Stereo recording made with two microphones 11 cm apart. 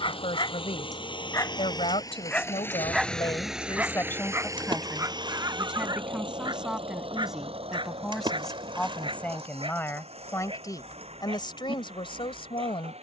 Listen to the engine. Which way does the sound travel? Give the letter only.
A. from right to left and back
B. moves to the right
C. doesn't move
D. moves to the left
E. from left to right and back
B.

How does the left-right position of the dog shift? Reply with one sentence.
In this clip you hear the dog move to the right.